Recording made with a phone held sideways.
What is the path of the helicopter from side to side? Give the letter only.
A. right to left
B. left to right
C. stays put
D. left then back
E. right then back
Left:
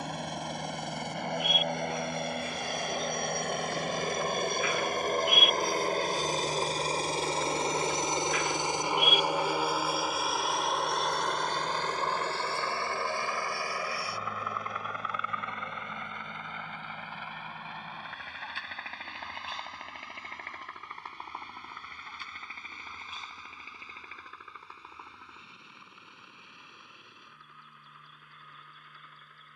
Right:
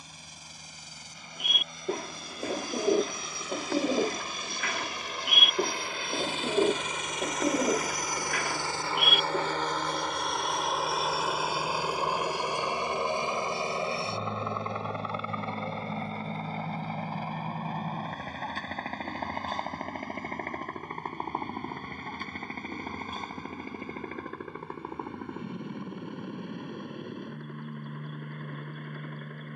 B.